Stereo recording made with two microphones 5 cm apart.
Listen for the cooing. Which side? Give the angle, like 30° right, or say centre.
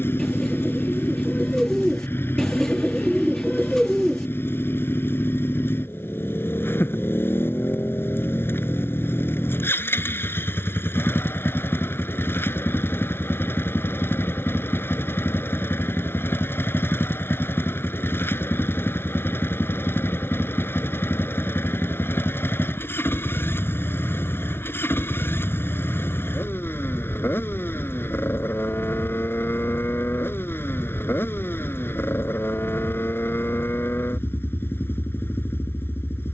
10° left.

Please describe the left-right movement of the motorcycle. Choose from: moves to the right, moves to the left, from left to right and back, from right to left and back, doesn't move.
doesn't move.